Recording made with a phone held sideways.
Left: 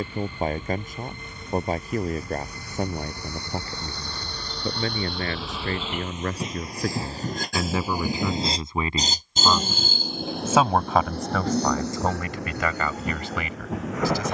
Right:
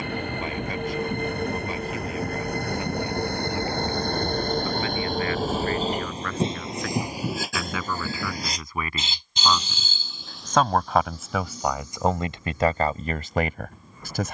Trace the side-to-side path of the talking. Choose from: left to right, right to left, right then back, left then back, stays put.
left to right.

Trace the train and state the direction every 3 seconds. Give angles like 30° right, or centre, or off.
70° right, 50° right, 10° right, 60° left, 80° left.